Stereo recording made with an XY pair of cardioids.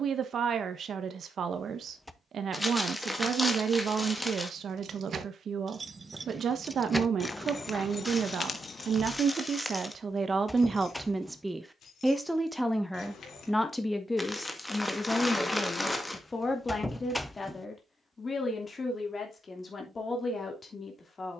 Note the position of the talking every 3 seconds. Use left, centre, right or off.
right, right, right, right, centre, left, left.